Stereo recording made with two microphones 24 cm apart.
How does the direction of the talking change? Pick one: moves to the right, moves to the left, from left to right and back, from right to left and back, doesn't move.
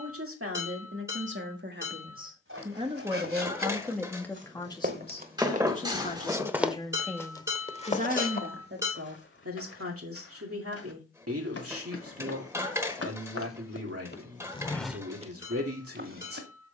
from right to left and back.